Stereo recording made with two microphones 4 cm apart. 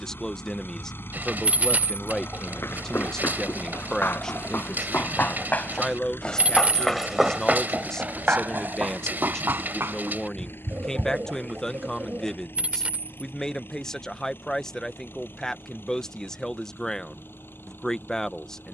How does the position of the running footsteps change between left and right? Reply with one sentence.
You can hear the running footsteps move from left to right.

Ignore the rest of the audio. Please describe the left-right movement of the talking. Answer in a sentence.
In this clip you hear the talking stay put.